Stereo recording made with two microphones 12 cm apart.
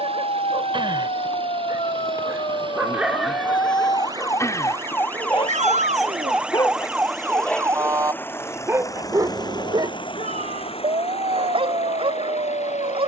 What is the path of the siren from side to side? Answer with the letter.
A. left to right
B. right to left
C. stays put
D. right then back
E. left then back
A.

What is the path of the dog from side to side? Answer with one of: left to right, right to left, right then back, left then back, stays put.
left then back.